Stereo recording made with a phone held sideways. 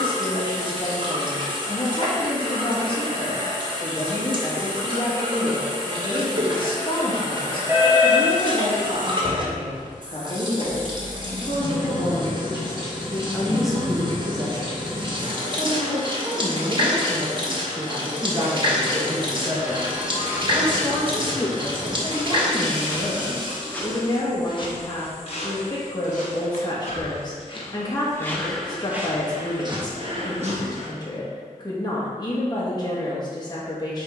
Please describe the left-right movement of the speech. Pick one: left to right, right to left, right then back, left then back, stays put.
right then back.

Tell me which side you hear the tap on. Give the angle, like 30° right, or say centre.
30° right.